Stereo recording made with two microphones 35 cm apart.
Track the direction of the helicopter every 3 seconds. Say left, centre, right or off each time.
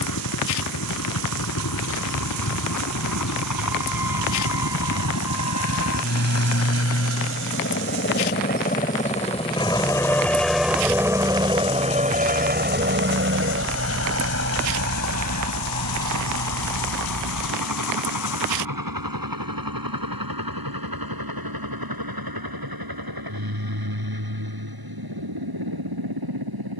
left, left, left, centre, right, right, right, right, right.